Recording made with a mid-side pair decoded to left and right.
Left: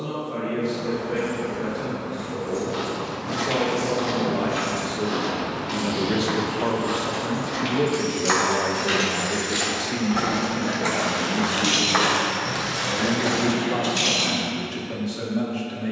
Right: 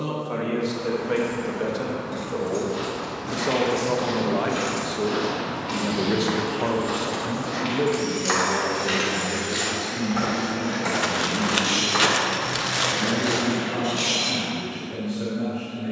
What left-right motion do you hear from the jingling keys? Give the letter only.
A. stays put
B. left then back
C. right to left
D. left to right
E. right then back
C.